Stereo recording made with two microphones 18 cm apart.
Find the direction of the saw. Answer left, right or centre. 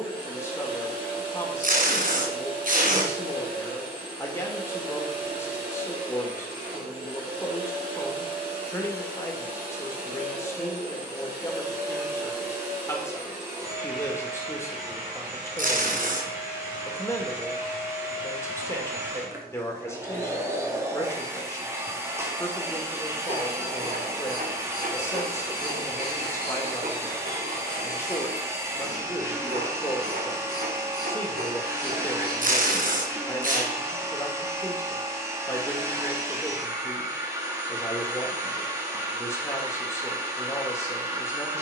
right.